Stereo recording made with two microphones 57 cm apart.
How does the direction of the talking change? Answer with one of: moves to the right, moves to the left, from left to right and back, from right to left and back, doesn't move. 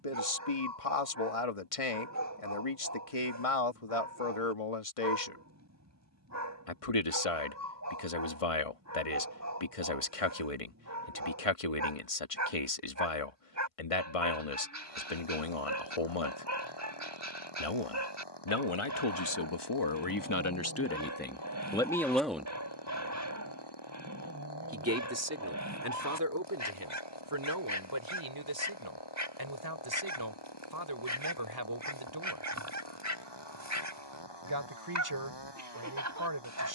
moves to the right.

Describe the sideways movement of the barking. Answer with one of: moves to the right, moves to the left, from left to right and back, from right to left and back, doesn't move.
doesn't move.